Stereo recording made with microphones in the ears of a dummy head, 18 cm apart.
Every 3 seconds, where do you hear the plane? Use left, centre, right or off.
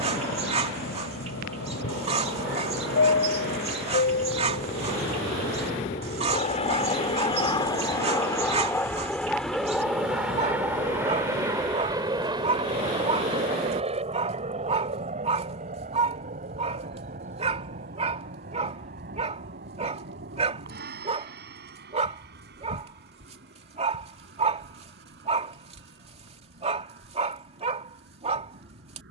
left, left, left, centre, right, right, right, right, right, right.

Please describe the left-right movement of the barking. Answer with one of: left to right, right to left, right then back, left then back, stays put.
stays put.